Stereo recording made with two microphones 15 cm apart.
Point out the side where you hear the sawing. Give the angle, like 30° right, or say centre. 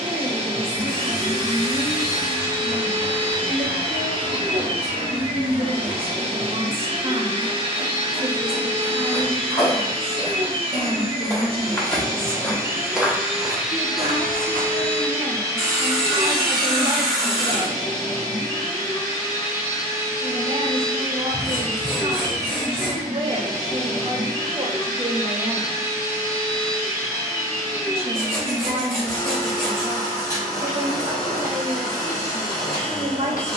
centre.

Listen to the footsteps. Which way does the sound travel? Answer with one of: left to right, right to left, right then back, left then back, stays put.
left to right.